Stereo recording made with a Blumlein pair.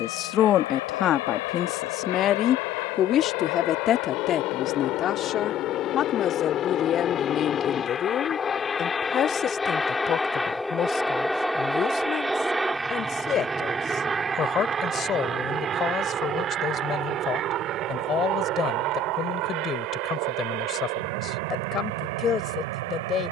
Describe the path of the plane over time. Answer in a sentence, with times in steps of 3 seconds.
In this clip you hear the plane on the left from 0 s, in the centre from 9 s and on the right from 15 s.